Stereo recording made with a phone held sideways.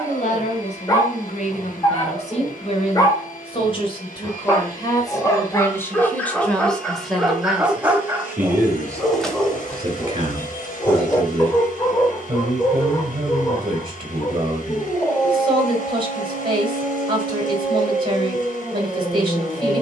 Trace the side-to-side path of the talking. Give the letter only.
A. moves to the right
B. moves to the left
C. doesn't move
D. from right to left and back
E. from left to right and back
A.